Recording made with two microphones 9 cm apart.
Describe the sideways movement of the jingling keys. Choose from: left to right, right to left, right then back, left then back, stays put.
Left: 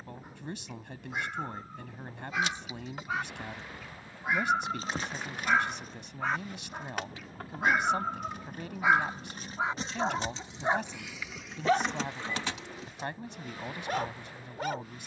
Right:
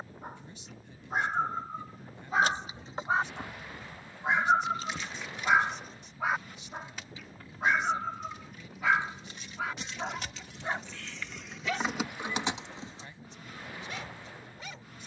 left then back.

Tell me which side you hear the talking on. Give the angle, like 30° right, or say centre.
80° left.